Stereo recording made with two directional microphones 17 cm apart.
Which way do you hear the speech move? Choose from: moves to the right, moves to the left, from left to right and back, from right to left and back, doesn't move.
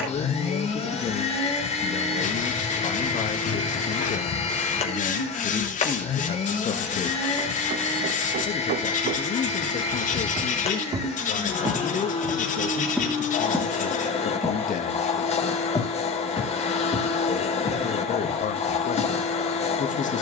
doesn't move.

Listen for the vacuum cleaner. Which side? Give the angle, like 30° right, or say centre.
40° left.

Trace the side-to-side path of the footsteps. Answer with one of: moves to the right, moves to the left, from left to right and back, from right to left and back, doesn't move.
moves to the left.